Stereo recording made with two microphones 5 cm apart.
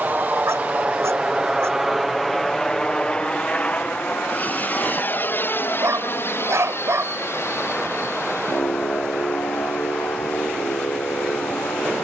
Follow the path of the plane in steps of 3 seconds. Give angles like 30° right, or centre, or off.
10° right, 30° left, 50° left, 60° left.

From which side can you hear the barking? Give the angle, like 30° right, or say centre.
60° right.